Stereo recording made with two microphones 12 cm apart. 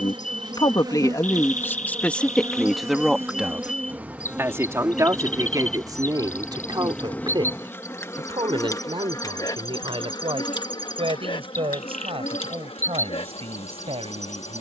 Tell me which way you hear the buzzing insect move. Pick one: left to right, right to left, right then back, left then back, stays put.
right to left.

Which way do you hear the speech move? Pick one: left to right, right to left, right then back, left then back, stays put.
left to right.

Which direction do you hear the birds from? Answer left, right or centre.
left.